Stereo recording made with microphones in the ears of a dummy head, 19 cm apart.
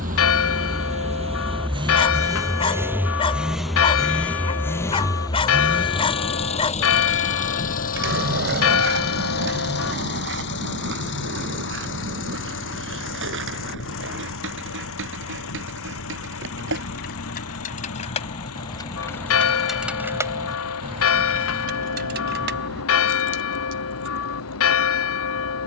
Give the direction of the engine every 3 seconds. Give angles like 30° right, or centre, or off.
20° right, 10° left, 30° left, 50° left, 60° left, 70° left, 70° left, 70° left, 70° left.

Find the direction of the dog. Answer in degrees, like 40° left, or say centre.
20° left.